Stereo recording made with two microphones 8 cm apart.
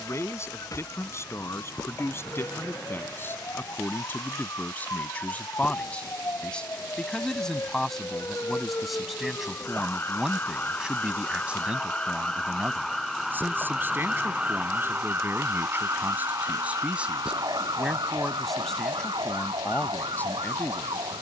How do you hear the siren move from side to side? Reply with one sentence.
In this clip you hear the siren move to the right.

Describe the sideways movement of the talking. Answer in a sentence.
You can hear the talking move from left to right and back again.